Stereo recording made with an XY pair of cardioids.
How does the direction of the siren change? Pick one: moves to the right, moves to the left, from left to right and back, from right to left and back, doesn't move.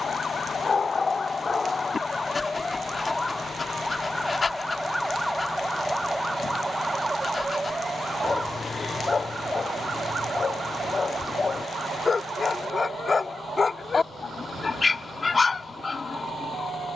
moves to the right.